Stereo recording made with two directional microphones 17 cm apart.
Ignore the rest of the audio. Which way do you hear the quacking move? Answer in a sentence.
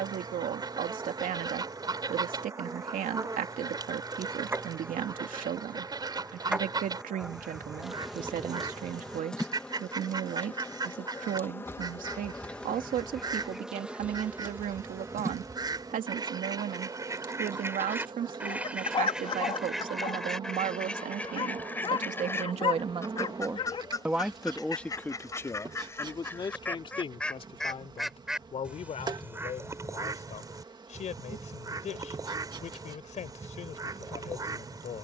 You can hear the quacking move from right to left and back again.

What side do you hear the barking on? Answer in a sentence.
In this clip you hear the barking on the left.